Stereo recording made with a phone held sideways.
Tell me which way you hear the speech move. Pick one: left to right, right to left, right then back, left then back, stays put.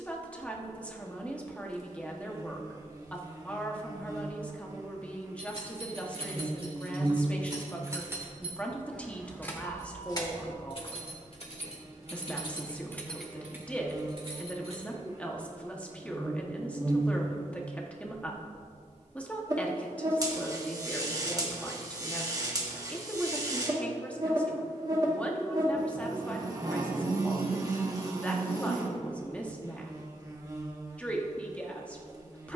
stays put.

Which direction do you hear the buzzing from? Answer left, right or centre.
right.